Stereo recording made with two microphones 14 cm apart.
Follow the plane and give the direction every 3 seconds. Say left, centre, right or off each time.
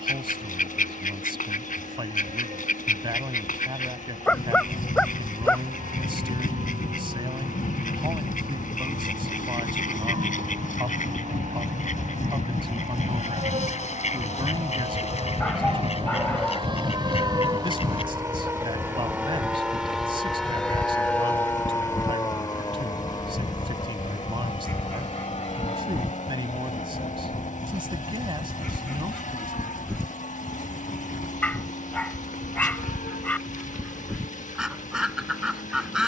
right, right, right, right, right, right, centre, left, left, left, left, left.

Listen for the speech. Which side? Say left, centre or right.
right.